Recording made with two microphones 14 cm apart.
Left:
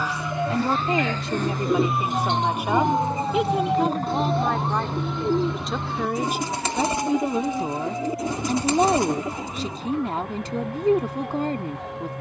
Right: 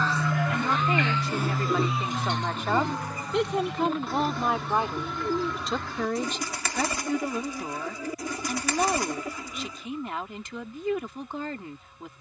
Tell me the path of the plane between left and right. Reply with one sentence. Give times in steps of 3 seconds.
In this clip you hear the plane in the centre from 0 s and on the left from 3 s.